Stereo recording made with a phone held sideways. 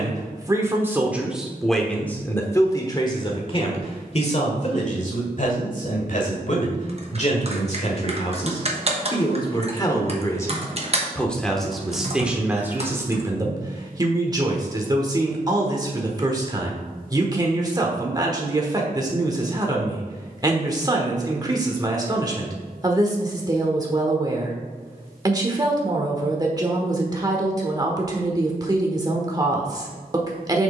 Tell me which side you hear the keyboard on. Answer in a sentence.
In this clip you hear the keyboard on the right.